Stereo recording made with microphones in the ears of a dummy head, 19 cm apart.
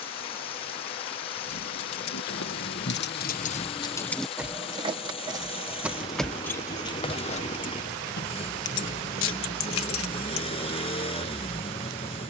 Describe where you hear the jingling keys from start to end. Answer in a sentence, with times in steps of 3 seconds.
In this clip you hear the jingling keys on the left from 0 s, in the centre from 3 s and on the left from 6 s.